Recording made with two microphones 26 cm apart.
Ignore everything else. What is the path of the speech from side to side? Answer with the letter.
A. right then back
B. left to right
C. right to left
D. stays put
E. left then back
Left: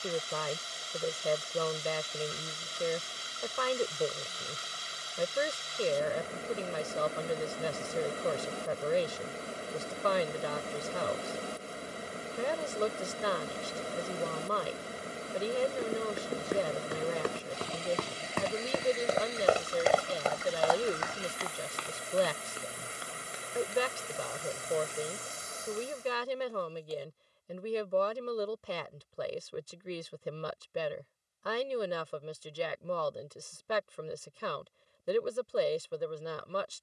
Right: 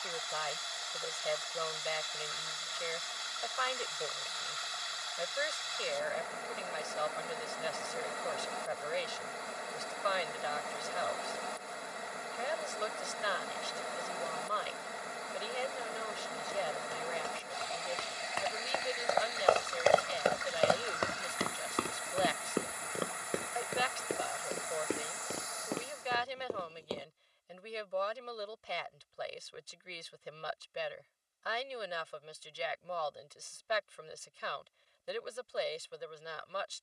D.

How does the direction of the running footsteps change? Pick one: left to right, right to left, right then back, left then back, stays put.
left to right.